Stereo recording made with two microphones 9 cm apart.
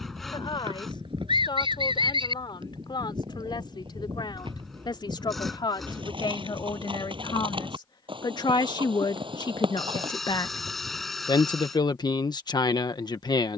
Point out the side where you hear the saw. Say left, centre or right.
centre.